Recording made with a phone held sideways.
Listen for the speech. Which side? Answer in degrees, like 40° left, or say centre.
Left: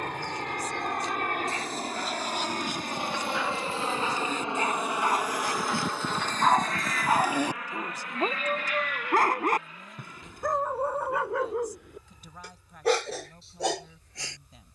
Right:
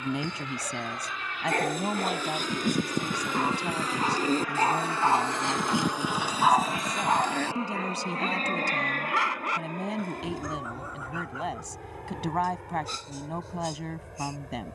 90° right.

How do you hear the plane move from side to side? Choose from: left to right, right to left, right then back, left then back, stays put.
left to right.